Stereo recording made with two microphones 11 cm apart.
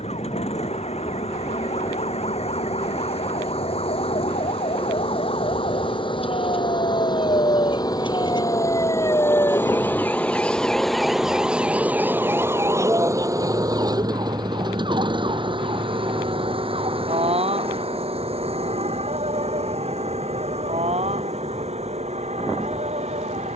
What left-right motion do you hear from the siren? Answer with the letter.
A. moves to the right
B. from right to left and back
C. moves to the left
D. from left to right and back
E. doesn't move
A.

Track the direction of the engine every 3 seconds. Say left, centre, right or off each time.
left, left, left, centre, right, right, right, right.